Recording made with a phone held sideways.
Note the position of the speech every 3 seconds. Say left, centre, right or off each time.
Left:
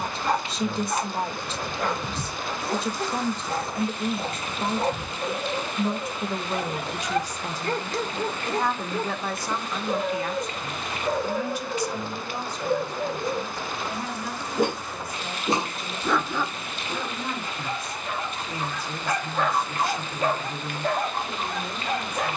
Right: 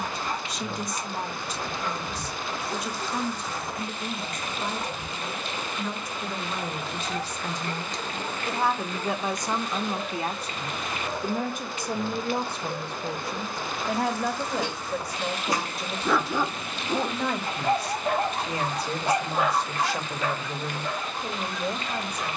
left, left, centre, right, right, right, right, right.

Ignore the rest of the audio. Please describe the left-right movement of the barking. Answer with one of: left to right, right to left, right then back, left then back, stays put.
right then back.